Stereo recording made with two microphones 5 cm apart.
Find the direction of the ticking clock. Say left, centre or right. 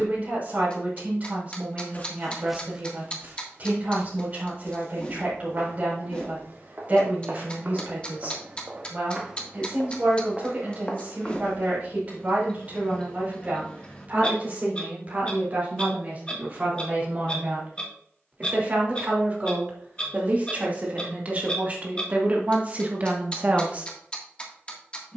left.